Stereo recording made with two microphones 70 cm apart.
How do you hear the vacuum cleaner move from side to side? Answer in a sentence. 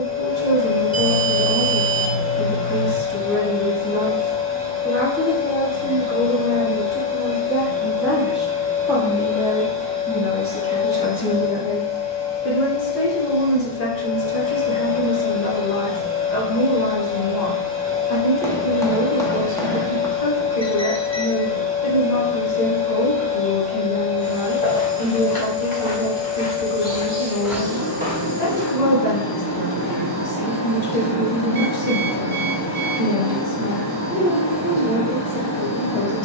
You can hear the vacuum cleaner stay put.